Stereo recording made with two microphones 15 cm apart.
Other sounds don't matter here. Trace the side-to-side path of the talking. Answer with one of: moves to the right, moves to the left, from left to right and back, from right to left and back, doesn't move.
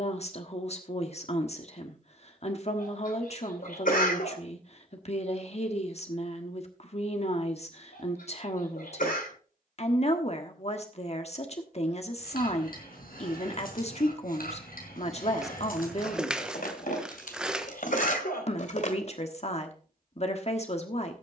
doesn't move.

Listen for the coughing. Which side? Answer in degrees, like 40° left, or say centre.
70° left.